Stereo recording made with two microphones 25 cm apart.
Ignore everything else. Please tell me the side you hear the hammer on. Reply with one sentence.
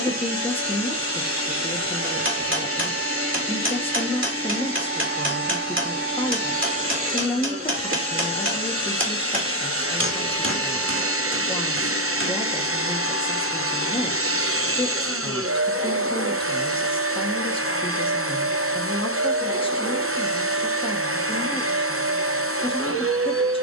In this clip you hear the hammer on the right.